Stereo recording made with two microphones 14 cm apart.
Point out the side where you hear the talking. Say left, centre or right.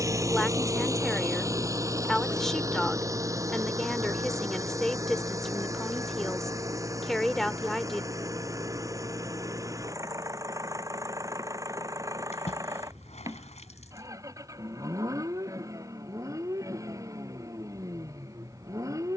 centre.